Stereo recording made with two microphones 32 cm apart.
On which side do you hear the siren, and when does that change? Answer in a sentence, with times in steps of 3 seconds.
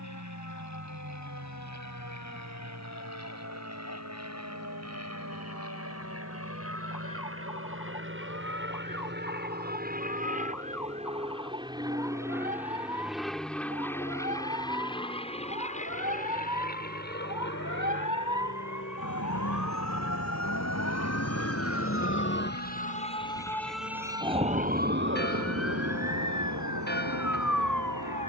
In this clip you hear the siren on the left from 0 s and on the right from 24 s.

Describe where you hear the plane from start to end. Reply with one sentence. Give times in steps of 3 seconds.
You can hear the plane on the right from 0 s, in the centre from 12 s and on the left from 15 s.